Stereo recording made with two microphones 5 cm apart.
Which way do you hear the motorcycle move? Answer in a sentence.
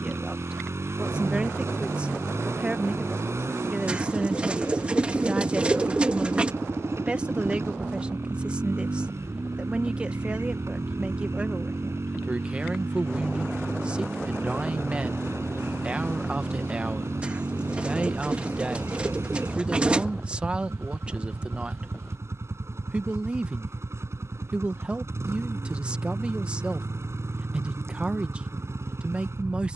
In this clip you hear the motorcycle stay in one place.